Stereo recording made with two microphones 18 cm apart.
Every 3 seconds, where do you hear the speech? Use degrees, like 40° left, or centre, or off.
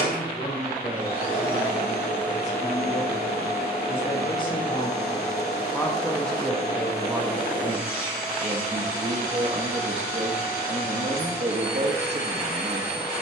40° left, 30° left, 20° right, 40° right, 40° right.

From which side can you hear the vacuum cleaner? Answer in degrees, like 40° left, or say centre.
60° left.